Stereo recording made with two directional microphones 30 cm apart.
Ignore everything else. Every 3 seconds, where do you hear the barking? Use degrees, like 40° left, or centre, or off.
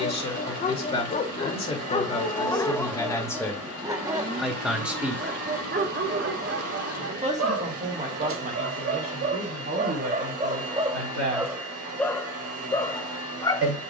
20° left, 20° right, 40° right, 20° right, 10° left.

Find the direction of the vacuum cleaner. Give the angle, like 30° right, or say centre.
50° right.